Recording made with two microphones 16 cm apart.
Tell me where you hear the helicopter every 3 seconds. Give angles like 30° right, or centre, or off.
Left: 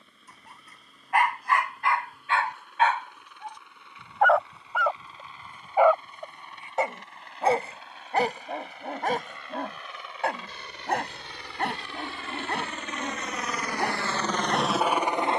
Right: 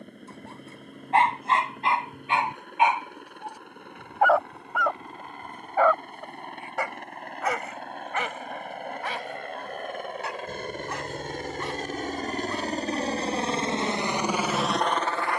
60° right, 60° right, 60° right, 50° right, 30° right.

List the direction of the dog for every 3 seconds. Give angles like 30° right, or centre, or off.
20° right, centre, 30° left, 50° left, 60° left.